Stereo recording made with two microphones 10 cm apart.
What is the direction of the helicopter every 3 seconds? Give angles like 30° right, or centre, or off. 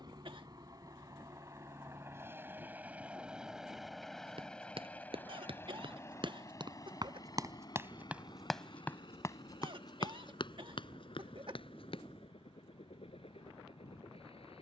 30° right, 10° left, 40° left, 60° left, 60° left.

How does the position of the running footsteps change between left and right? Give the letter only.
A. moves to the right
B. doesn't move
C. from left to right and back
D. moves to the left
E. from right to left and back
D.